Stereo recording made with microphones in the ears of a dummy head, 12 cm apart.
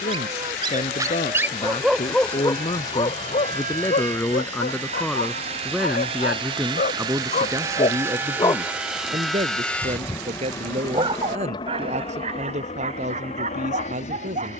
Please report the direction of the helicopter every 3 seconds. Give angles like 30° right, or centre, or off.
60° right, 50° right, 20° right, 20° left, 50° left.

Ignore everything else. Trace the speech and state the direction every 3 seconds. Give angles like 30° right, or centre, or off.
40° left, 10° left, 20° right, 50° right, 60° right.